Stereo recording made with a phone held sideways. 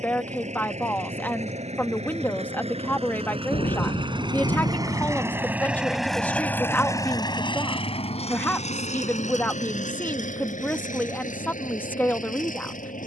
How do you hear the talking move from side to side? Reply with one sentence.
You can hear the talking stay in one place.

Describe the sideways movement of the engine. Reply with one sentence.
In this clip you hear the engine go from the right side to the left.